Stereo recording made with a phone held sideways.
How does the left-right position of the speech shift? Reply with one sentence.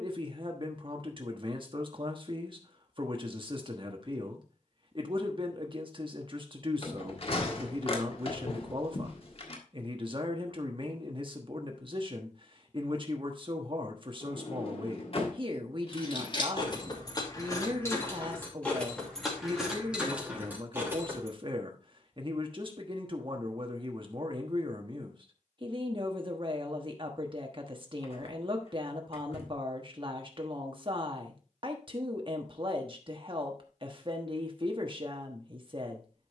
You can hear the speech stay in one place.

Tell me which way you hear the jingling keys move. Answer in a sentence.
In this clip you hear the jingling keys go from the left side to the right.